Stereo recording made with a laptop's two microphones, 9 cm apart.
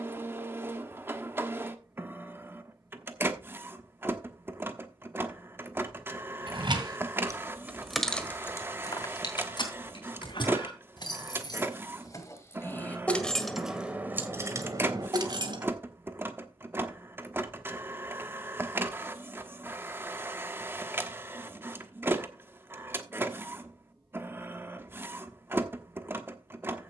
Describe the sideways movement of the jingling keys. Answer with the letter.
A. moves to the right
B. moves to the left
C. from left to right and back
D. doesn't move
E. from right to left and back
E.